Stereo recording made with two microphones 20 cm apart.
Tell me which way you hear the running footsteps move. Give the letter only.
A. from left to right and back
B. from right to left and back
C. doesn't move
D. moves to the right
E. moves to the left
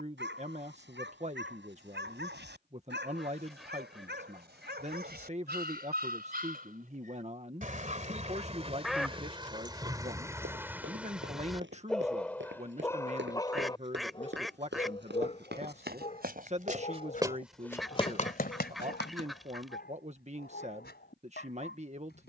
E.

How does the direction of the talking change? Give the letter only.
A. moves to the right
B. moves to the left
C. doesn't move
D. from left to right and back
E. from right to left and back
C.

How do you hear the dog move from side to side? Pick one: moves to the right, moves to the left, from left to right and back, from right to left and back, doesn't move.
moves to the left.